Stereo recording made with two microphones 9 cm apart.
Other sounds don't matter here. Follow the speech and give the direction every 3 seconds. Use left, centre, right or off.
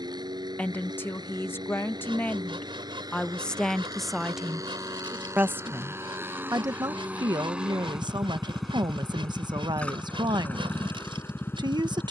left, centre, right, right.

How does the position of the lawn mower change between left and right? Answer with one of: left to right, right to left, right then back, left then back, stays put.
right to left.